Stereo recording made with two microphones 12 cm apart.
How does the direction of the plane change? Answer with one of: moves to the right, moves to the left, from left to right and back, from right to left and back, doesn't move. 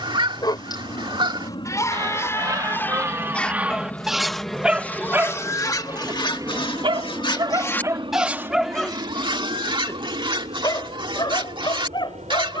moves to the right.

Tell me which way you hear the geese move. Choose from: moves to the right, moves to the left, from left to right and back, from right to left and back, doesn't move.
from right to left and back.